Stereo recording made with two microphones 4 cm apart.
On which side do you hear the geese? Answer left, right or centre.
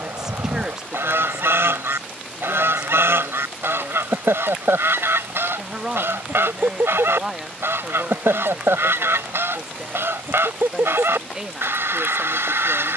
right.